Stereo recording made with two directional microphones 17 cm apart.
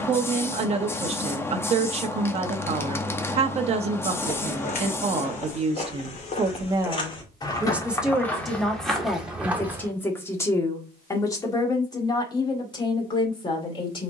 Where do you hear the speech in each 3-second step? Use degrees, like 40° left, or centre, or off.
40° right, 40° right, 10° right, 20° left, 30° left.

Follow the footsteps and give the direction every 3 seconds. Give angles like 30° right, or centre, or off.
off, 50° left, 20° left, 10° right, off.